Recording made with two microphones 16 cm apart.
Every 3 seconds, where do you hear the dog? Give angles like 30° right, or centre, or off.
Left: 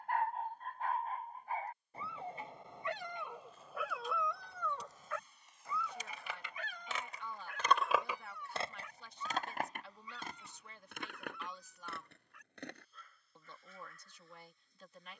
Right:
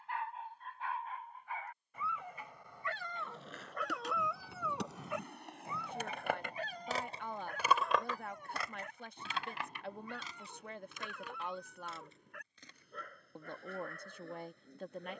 40° left, centre, 40° right, 60° right, 70° right.